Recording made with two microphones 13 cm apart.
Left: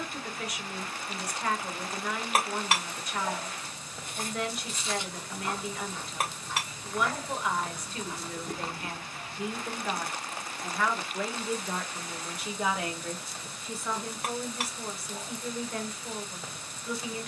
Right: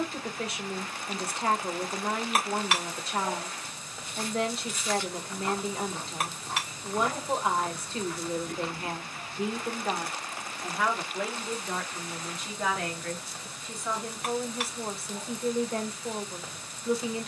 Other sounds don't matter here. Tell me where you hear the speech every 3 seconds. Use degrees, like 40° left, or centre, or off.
30° right, 30° right, 30° right, 10° right, centre, 30° right.